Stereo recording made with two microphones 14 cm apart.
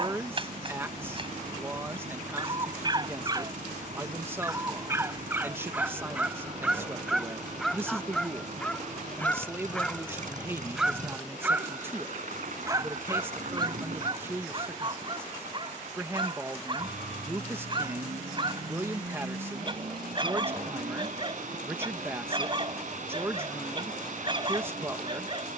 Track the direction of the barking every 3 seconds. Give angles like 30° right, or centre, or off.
40° right, 20° right, centre, centre, 30° right, 40° right, 40° right, 40° right, 40° right.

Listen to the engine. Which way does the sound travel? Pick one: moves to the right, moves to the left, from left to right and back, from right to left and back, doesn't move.
doesn't move.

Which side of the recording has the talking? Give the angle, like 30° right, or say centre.
20° right.